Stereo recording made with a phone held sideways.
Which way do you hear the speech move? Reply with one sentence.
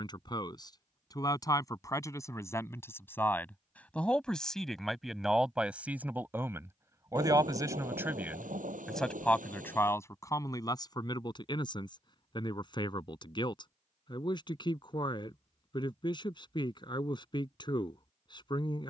In this clip you hear the speech move from left to right and back again.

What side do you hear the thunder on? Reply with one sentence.
In this clip you hear the thunder on the right.